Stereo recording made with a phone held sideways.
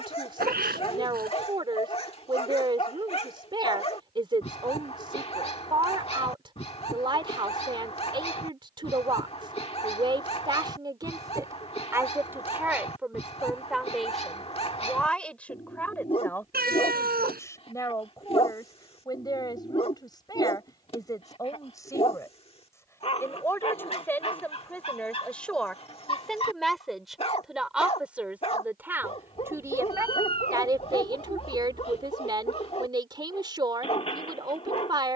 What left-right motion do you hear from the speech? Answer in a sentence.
In this clip you hear the speech go left and come back.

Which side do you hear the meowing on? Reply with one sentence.
In this clip you hear the meowing on the right.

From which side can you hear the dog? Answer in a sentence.
You can hear the dog on the left.